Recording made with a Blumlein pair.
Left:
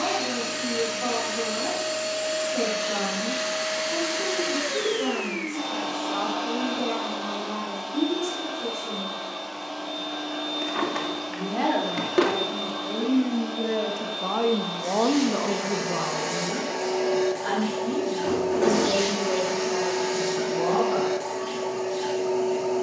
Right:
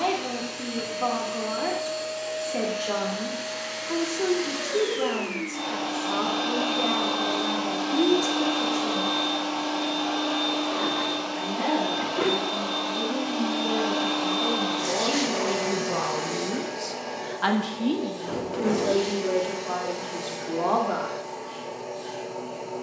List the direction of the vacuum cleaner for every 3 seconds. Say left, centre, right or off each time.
left, centre, right, right, right, centre, left, left.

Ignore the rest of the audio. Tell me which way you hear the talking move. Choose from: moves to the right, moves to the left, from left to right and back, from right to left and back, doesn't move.
from right to left and back.